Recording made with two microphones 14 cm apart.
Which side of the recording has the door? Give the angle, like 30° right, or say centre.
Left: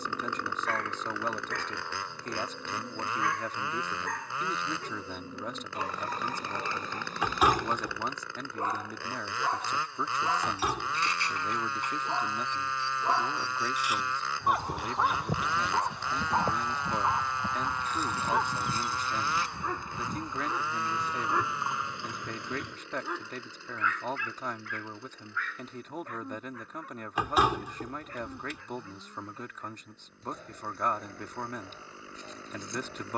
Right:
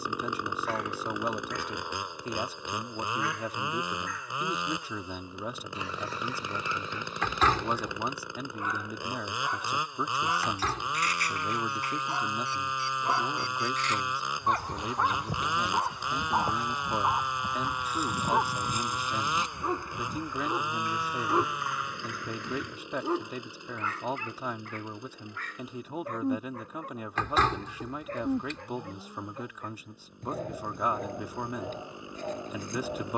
10° left.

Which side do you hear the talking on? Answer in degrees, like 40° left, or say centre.
10° right.